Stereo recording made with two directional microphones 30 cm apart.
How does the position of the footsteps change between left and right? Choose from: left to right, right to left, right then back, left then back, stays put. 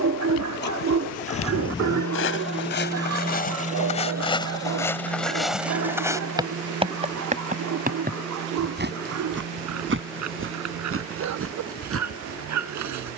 left to right.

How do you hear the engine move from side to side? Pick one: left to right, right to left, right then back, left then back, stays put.
left to right.